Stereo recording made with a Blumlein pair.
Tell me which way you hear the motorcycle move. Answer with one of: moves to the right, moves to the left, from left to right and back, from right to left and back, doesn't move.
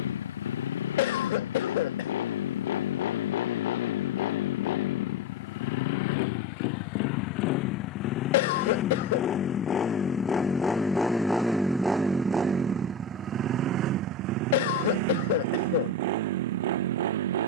moves to the right.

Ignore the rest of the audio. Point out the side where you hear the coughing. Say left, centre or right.
left.